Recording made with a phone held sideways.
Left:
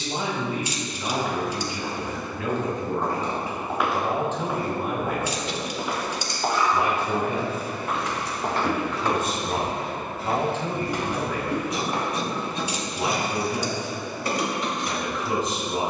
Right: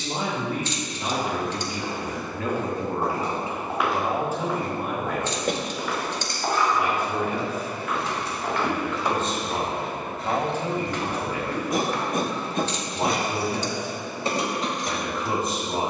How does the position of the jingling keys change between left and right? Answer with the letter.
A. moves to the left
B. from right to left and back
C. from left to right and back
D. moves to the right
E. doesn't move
B.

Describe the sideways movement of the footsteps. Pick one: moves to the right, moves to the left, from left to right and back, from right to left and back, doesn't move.
moves to the left.